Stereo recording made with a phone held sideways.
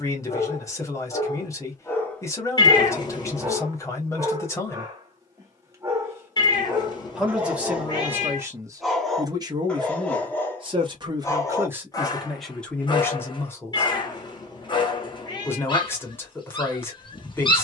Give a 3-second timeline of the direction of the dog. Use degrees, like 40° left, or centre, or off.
20° left, 20° right, 10° right, 10° left, 30° left, 30° left.